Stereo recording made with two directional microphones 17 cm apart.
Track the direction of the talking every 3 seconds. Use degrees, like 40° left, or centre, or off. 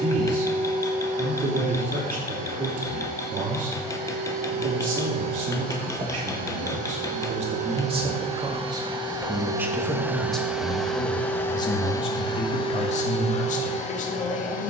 50° right, 50° right, 40° right, 10° left, 50° left.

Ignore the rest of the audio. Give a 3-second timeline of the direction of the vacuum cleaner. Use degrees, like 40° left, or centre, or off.
70° right, 60° right, 40° right, centre, 40° left.